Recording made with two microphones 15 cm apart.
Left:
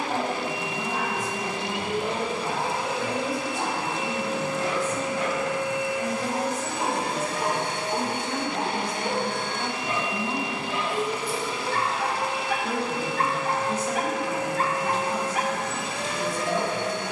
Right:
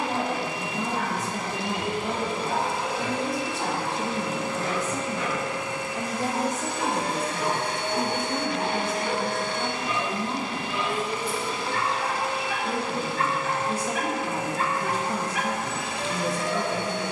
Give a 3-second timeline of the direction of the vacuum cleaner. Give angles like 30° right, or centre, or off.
70° left, 60° left, 40° left, 10° left, 10° right, 10° right.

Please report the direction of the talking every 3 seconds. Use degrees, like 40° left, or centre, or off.
60° right, 60° right, 30° right, centre, 10° right, 60° right.